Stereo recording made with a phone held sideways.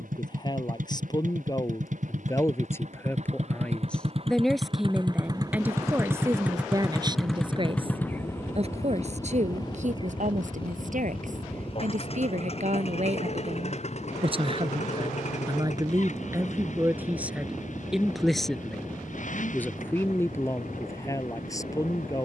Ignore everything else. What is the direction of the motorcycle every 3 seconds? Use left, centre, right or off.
right, right, centre, left, left, left, left, left.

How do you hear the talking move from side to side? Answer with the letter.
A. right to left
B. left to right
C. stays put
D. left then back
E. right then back
E.